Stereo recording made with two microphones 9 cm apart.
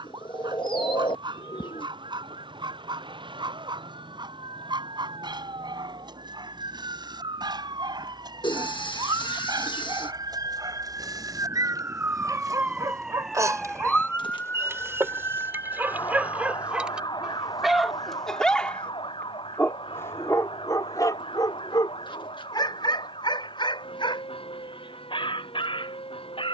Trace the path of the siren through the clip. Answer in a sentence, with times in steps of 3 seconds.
You can hear the siren on the right from 0 s, in the centre from 12 s and on the left from 15 s.